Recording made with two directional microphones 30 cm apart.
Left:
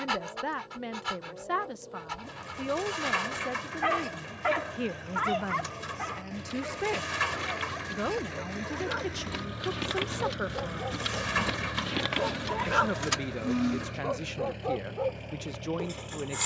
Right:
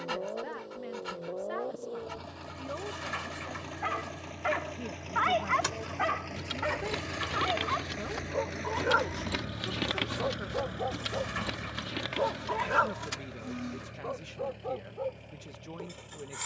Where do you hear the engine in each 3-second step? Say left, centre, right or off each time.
right, right, right, centre, left, left.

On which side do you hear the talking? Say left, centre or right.
left.